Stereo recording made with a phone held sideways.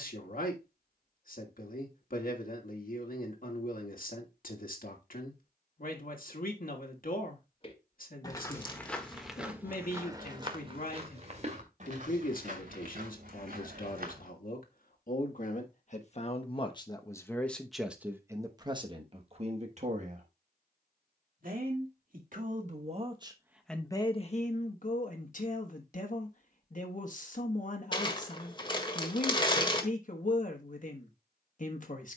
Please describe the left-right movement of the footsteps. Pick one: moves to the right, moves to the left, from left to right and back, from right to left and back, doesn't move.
moves to the right.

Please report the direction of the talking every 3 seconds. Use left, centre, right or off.
left, left, left, left, left, left, right, right, left, left, left.